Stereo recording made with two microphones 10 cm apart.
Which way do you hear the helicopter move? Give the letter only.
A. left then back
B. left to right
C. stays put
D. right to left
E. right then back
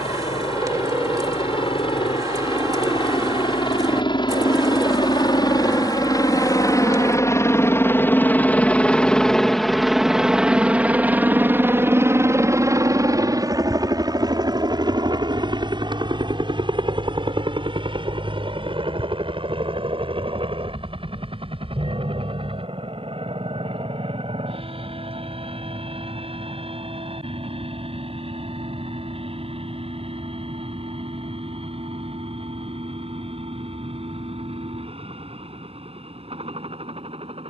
B.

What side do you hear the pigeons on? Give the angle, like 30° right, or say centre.
40° right.